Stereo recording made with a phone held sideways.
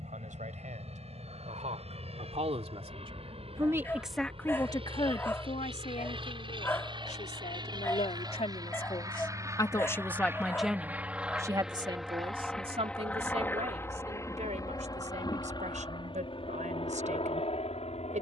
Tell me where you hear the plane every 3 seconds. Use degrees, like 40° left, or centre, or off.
60° right, 50° right, 40° right, 10° right, 10° left, 40° left.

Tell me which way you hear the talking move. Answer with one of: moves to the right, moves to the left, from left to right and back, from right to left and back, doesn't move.
from right to left and back.